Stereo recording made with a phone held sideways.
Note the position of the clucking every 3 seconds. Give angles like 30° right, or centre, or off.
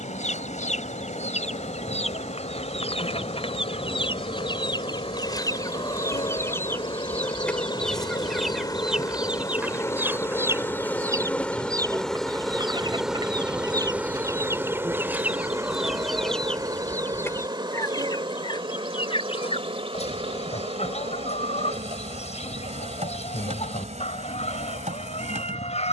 50° left, 30° left, 10° left, 20° right, 30° right, centre, 40° left, 50° left, 50° left.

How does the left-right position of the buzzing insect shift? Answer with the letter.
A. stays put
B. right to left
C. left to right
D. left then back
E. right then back
C.